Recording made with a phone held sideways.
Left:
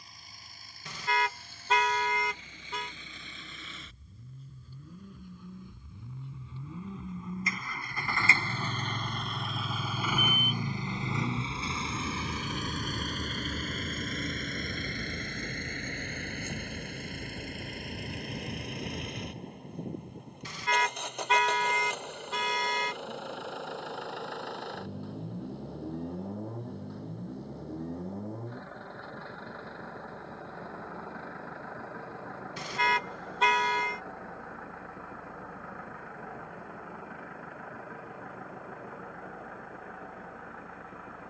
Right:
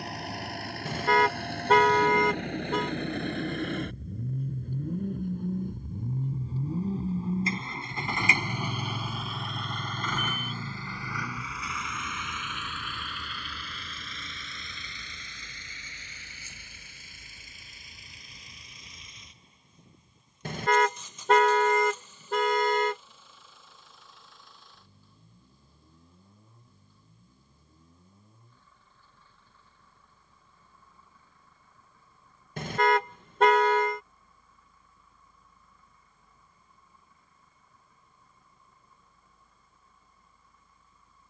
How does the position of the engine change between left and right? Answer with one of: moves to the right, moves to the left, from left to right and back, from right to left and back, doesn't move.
moves to the left.